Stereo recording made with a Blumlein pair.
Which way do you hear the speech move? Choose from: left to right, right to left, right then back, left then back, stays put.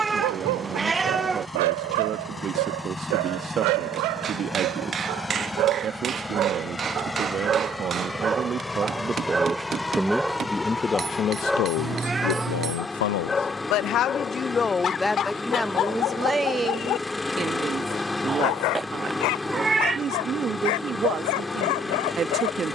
left then back.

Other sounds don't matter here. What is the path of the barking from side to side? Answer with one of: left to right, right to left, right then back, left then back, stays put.
right to left.